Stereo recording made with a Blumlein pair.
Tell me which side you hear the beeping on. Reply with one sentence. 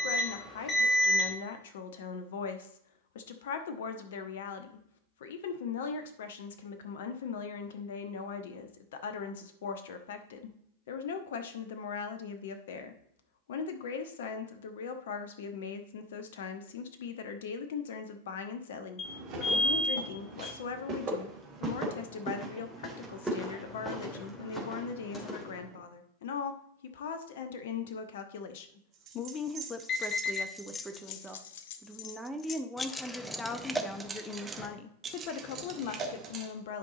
In this clip you hear the beeping on the left.